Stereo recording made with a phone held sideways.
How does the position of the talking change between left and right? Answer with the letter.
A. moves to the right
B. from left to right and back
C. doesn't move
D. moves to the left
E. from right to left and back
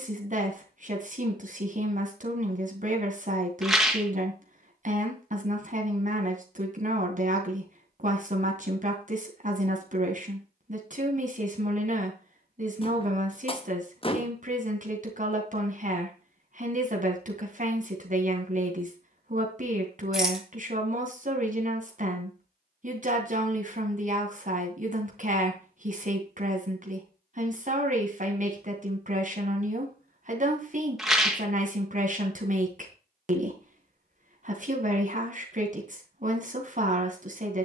C.